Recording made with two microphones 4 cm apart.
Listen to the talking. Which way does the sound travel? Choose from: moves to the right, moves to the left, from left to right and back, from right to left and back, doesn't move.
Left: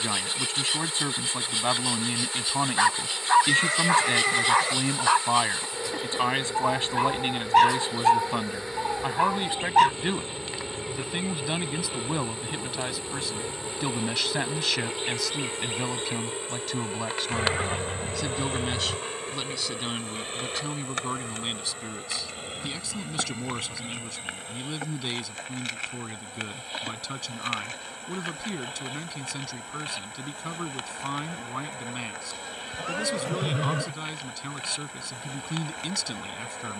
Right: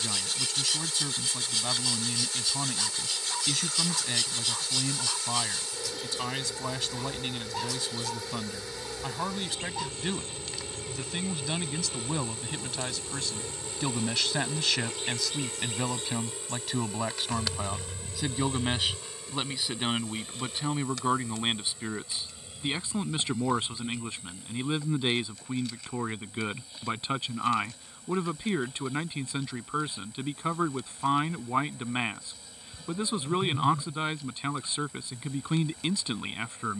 moves to the right.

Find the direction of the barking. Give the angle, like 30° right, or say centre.
60° left.